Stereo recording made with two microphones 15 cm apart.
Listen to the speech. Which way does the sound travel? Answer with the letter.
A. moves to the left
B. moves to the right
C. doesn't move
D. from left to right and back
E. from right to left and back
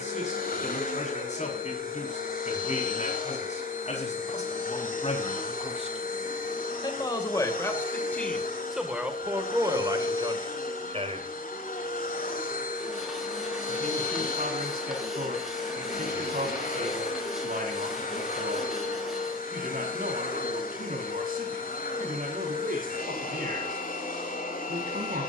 B.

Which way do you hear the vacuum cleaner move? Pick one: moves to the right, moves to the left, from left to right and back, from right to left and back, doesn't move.
doesn't move.